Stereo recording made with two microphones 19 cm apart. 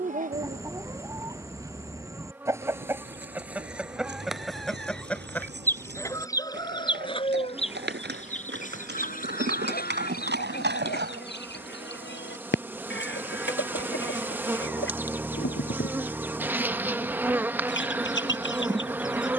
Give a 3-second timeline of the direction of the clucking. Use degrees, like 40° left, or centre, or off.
20° right, centre, 30° left, 60° left, 80° left, 80° left, 80° left.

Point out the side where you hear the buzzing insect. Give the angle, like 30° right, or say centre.
10° right.